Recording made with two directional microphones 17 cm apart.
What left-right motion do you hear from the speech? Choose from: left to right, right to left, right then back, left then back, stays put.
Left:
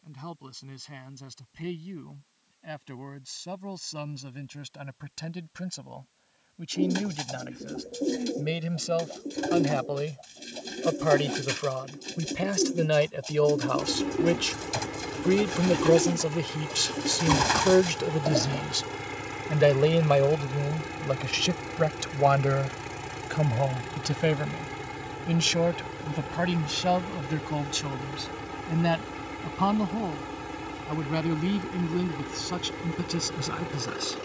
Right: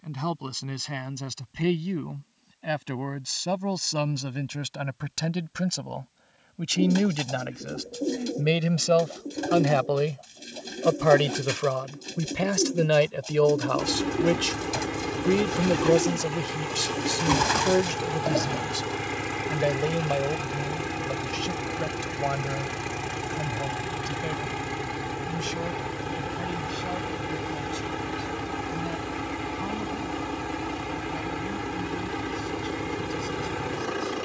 right to left.